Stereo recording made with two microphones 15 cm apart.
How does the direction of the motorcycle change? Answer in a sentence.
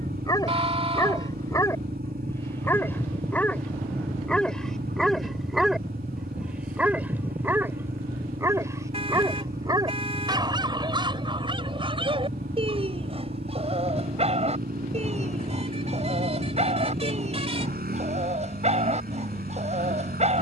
In this clip you hear the motorcycle stay in one place.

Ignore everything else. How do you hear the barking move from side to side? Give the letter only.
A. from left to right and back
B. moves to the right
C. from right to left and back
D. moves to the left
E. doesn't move
B.